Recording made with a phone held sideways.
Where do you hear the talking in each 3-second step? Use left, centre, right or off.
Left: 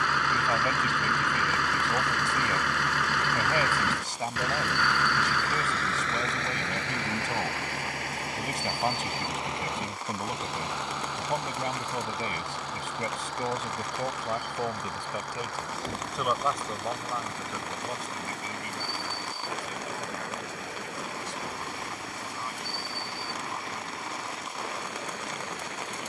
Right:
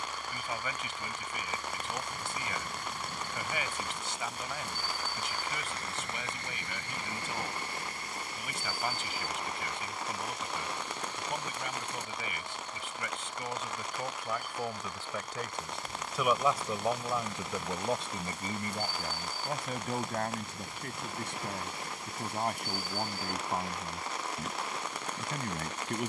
left, left, left, left, left, centre, right, right, right.